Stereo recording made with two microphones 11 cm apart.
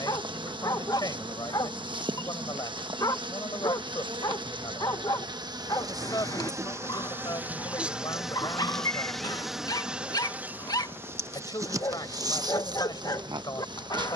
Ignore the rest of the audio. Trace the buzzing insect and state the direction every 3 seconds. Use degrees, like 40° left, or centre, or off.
40° right, 40° right, 10° right, 10° right, 40° right.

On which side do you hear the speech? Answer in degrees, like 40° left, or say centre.
40° left.